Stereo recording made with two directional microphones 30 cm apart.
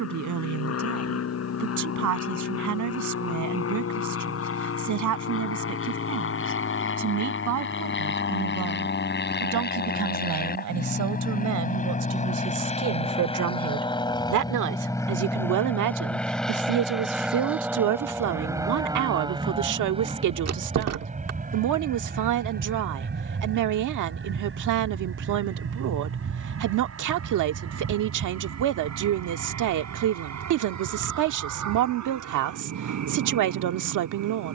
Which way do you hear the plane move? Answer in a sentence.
You can hear the plane move to the right.